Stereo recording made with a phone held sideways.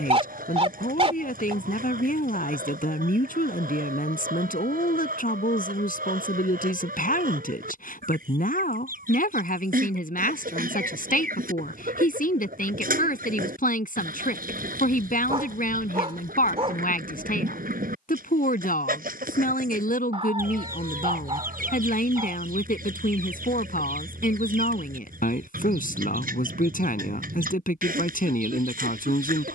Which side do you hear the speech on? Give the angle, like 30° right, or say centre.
70° left.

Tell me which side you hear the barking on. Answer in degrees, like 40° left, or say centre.
40° right.